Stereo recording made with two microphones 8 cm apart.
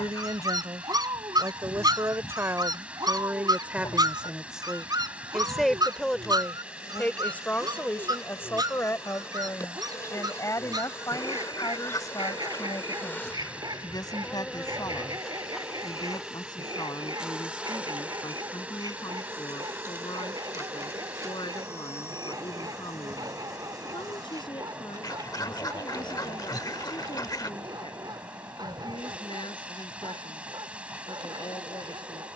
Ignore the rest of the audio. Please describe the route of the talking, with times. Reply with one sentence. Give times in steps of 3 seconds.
In this clip you hear the talking on the right from 0 s, in the centre from 3 s and on the left from 6 s.